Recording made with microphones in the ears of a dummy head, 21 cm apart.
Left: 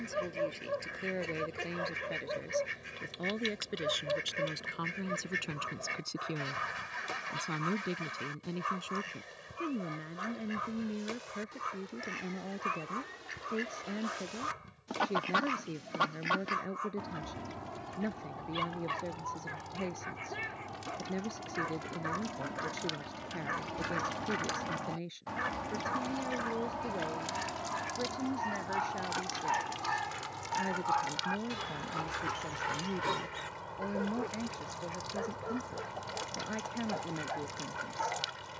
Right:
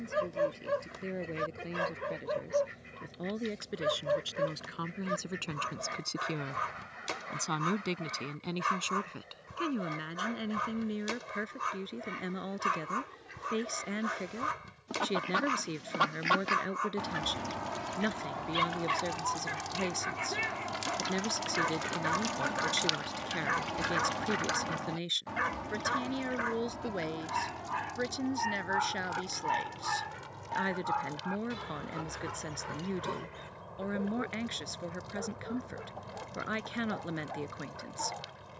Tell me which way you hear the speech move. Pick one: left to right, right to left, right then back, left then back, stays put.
left to right.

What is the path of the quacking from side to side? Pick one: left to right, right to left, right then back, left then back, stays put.
right then back.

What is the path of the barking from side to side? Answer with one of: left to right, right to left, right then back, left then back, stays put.
right to left.